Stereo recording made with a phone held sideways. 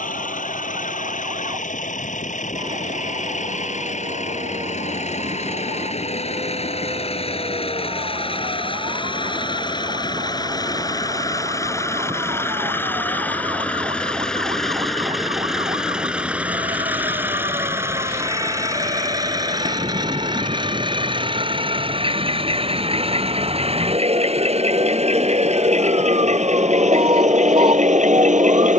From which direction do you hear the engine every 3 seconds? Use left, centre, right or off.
left, left, left, left, centre, centre, right, right, right, right.